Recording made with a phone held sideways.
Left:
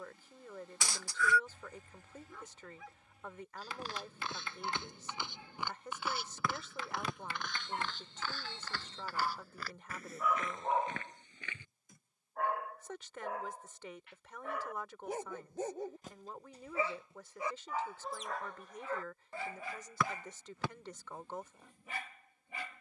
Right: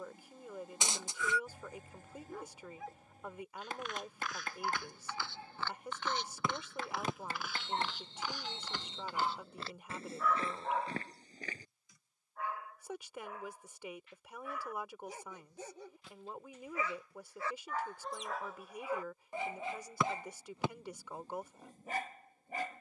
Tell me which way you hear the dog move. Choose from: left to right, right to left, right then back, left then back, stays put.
left then back.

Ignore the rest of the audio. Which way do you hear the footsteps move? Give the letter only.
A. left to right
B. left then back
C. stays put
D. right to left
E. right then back
A.